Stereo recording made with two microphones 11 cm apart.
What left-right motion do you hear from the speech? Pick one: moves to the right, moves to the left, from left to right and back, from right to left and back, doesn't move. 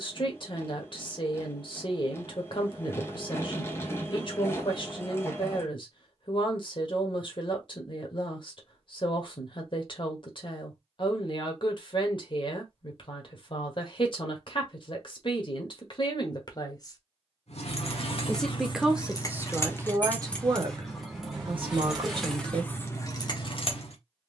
moves to the right.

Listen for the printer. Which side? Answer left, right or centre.
left.